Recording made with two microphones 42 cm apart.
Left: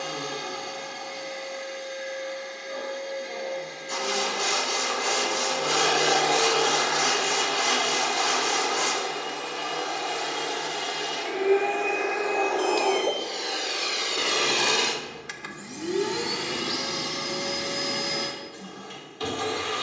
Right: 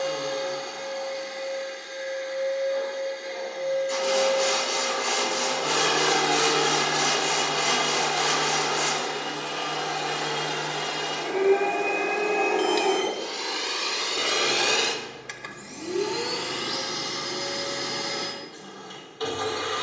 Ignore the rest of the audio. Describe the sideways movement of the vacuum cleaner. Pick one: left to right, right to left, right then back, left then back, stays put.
right then back.